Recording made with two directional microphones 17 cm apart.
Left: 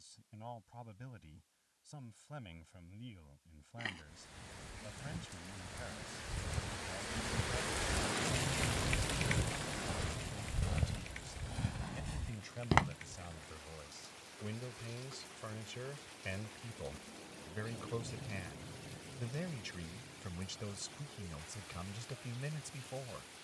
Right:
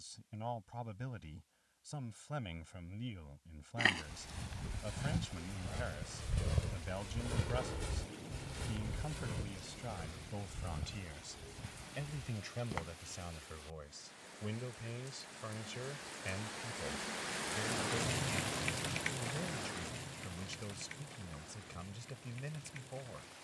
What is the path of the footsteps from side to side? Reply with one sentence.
In this clip you hear the footsteps go from the right side to the left.